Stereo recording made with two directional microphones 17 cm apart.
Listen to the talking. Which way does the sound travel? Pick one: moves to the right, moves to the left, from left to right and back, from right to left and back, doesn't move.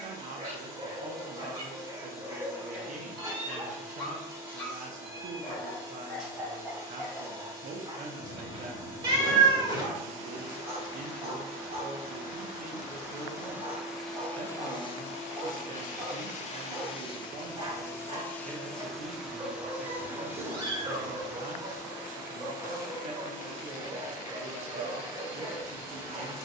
doesn't move.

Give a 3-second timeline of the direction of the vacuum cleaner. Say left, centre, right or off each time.
right, right, right, right, centre, left, centre, right, right.